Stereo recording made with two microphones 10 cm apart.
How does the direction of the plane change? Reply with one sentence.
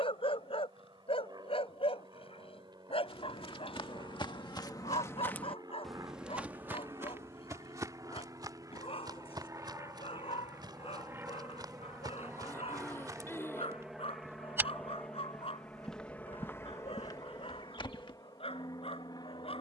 You can hear the plane travel towards the left.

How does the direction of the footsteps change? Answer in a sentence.
You can hear the footsteps go right and come back.